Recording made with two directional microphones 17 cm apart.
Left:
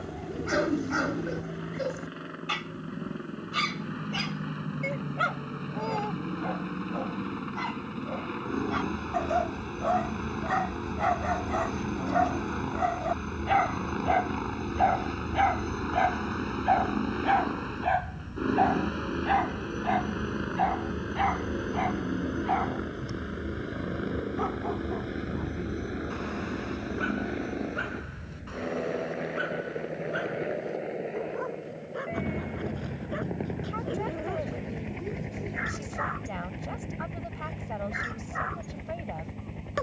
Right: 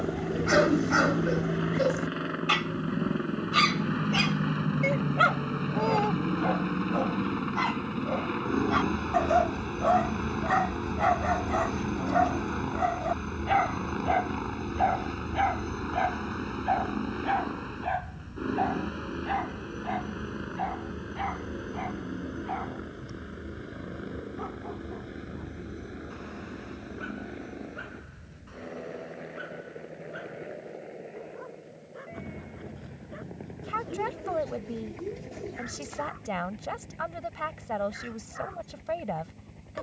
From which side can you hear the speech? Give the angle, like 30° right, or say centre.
30° right.